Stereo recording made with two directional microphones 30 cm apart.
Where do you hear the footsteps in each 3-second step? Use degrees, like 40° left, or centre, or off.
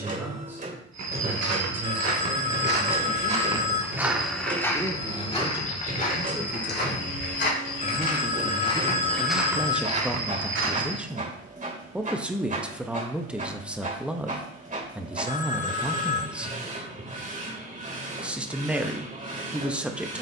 50° right, centre, 30° left, 20° right, off, off, off.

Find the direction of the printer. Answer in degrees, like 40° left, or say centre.
30° right.